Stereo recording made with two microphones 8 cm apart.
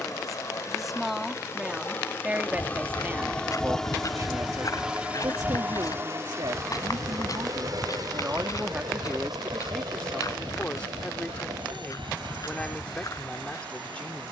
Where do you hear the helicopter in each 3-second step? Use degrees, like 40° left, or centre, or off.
30° left, 10° right, 50° right, 70° right, 80° right.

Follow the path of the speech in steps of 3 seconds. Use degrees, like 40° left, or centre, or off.
10° right, 50° right, 50° right, 10° left, 10° left.